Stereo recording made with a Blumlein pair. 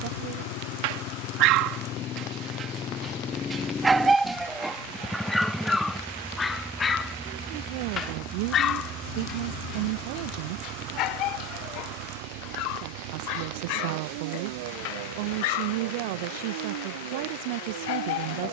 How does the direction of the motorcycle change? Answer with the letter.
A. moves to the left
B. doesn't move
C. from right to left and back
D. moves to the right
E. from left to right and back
D.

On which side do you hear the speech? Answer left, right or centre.
right.